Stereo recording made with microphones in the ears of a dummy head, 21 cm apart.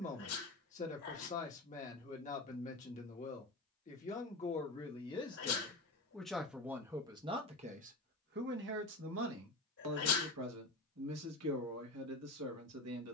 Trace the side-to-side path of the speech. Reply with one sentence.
In this clip you hear the speech move from left to right.